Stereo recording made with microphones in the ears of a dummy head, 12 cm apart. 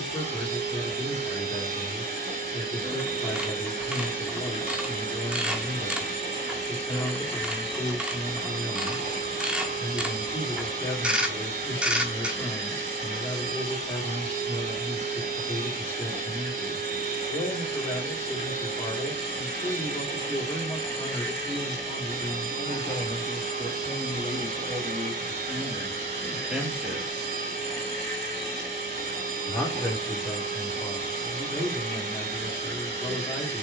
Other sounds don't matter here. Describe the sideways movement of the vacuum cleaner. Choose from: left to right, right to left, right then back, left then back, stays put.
stays put.